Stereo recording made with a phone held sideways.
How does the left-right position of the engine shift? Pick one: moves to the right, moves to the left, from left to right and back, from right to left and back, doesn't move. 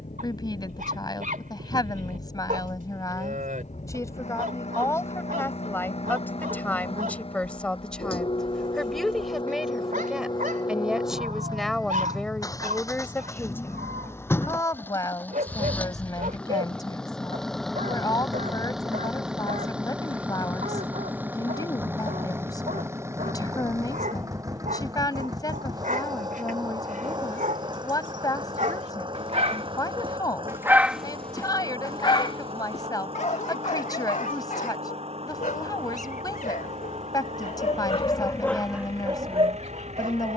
moves to the right.